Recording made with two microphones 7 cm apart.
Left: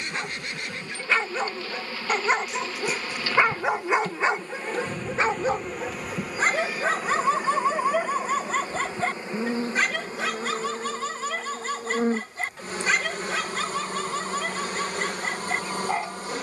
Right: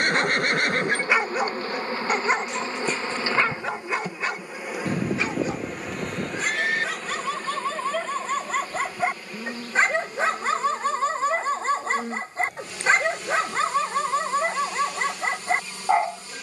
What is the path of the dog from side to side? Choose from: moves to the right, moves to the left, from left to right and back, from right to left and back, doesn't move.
from right to left and back.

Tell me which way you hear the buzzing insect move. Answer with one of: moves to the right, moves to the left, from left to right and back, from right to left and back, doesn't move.
moves to the left.